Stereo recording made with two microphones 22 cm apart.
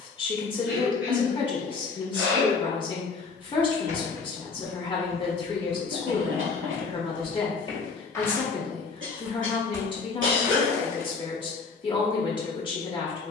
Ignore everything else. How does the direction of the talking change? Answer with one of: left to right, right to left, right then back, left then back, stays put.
stays put.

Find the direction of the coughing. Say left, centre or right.
right.